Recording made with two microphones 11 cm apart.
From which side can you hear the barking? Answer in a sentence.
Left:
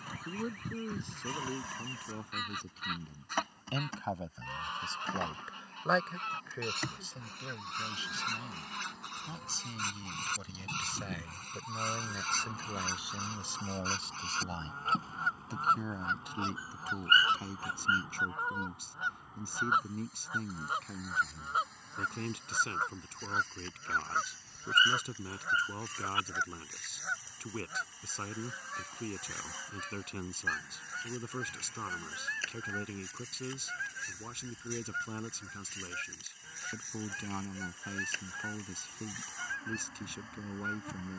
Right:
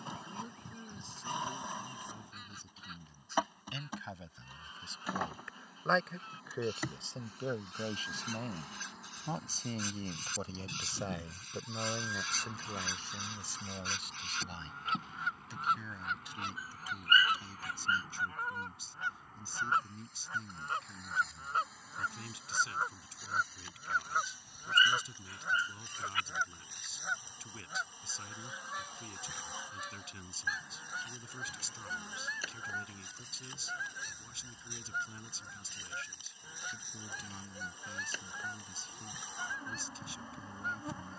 In this clip you hear the barking on the left.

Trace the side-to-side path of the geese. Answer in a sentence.
In this clip you hear the geese travel towards the right.